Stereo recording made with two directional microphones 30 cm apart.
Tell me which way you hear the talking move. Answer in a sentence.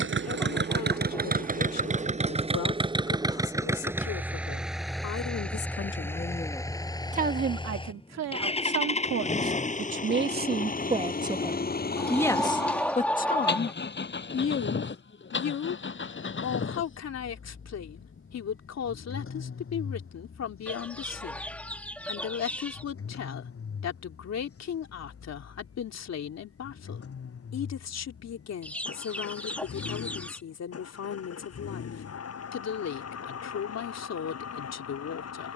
In this clip you hear the talking move from left to right and back again.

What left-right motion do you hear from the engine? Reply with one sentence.
You can hear the engine move to the left.